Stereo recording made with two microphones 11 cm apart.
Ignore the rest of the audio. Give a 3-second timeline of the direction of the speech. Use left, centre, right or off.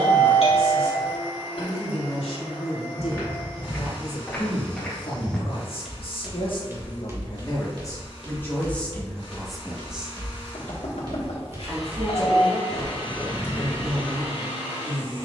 left, left, left, centre, right.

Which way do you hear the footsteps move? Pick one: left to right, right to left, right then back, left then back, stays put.
right then back.